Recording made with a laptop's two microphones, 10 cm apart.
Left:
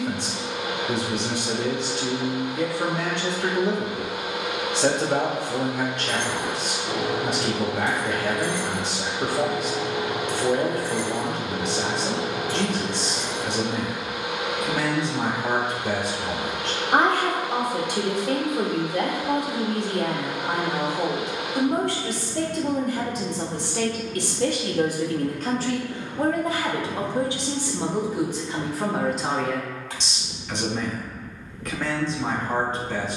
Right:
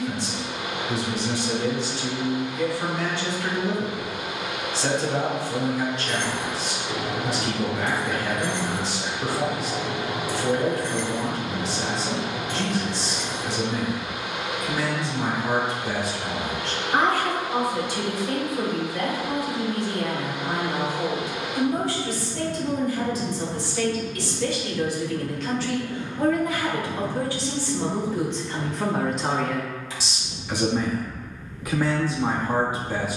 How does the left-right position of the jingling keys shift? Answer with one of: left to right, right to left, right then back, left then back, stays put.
right then back.